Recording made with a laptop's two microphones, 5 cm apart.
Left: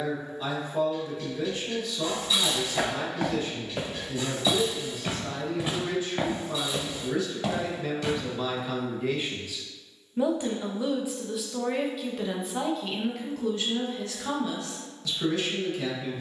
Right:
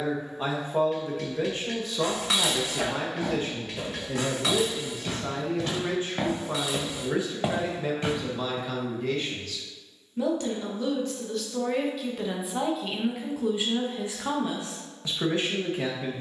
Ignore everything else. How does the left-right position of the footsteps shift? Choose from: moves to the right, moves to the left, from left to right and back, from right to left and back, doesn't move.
moves to the right.